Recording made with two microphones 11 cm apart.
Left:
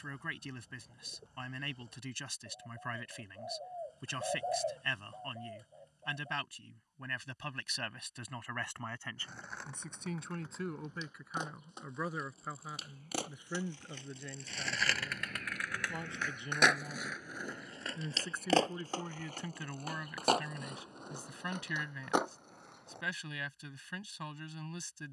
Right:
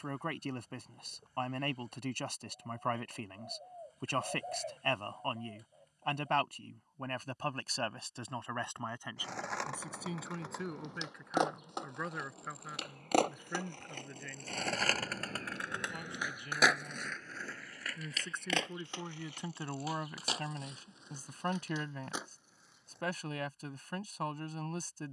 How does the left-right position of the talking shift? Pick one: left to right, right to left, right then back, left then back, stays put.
left then back.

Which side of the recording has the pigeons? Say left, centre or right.
left.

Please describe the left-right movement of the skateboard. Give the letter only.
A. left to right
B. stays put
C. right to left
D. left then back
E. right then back
C.